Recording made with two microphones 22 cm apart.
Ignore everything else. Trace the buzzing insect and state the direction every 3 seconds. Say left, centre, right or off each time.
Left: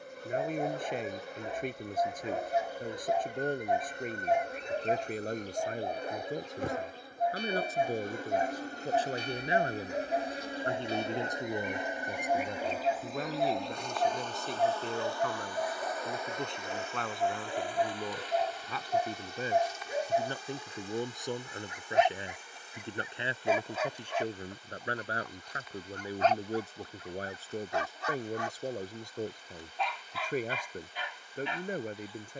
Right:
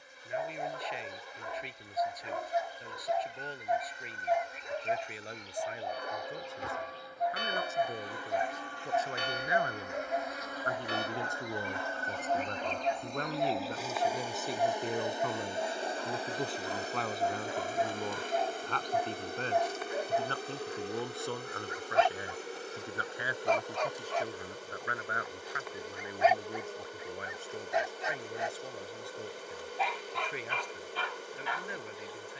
left, left, left, left, centre, right, right, right, right, right, right.